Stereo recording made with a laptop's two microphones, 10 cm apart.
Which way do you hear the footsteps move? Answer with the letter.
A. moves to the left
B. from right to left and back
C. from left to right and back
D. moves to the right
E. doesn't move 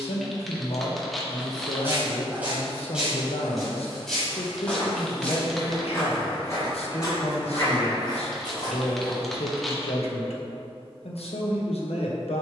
A.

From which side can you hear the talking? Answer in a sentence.
In this clip you hear the talking on the left.